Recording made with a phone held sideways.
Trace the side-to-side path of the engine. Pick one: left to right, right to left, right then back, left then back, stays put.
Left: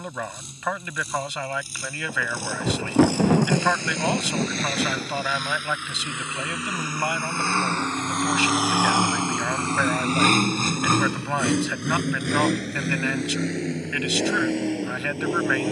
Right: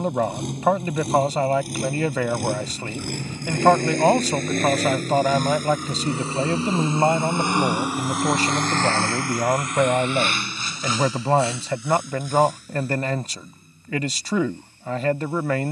right to left.